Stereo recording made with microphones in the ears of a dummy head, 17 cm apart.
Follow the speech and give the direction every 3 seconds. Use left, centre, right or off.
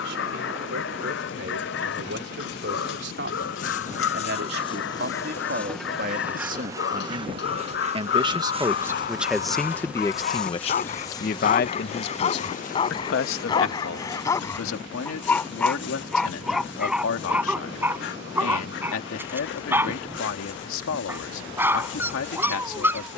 right, right, right, left, left, left, left, left.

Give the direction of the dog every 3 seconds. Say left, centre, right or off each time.
left, left, left, left, left, centre, centre, centre.